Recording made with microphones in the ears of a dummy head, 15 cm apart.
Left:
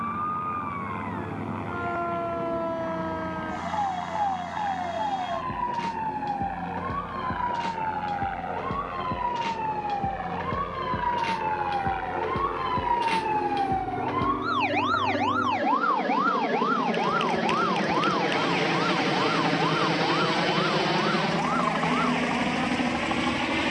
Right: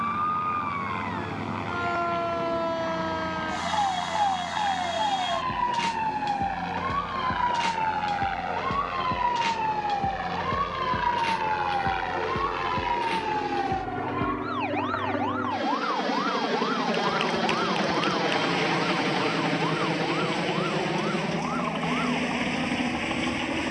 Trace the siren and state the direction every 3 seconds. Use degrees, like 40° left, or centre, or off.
60° right, 60° right, 50° right, 20° right, 20° left, 50° left, 70° left, 80° left.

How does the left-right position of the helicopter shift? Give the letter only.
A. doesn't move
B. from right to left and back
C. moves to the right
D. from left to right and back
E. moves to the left
E.